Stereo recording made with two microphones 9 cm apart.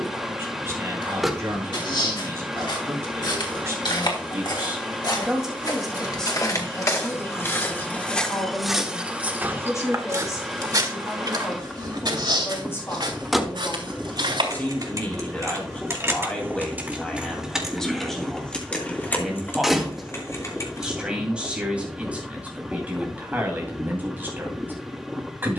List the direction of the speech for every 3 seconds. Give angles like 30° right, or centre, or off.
30° right, 20° right, 20° left, 30° left, 30° left, 10° left, centre, 20° right, 20° right.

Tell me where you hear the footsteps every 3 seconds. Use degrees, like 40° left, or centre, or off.
70° left, 60° left, 30° left, 40° right, 70° right, off, off, off, off.